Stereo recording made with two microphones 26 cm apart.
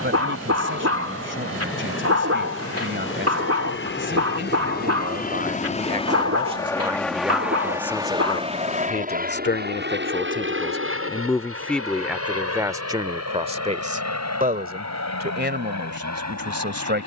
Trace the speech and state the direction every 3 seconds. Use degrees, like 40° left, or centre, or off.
50° right, 40° right, centre, 30° left, 20° right, 40° right.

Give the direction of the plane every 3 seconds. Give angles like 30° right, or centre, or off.
60° left, 40° left, centre, 40° right, 60° right, 70° right.